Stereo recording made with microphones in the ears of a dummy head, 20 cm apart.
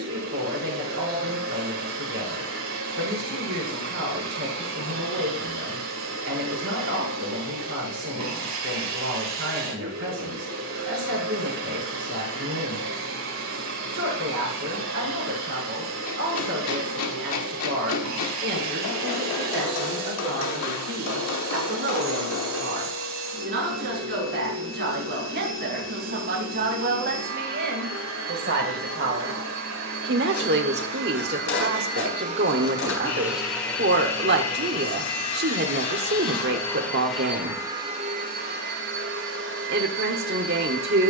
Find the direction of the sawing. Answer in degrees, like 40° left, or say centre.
60° left.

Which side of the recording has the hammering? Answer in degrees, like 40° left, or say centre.
80° left.